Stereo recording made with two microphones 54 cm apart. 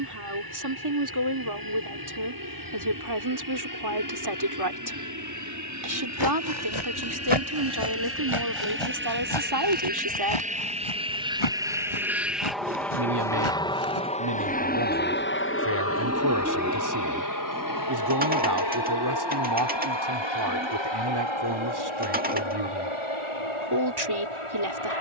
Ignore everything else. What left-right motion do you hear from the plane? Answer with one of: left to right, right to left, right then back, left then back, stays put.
right to left.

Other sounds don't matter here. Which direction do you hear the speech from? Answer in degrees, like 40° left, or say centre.
50° right.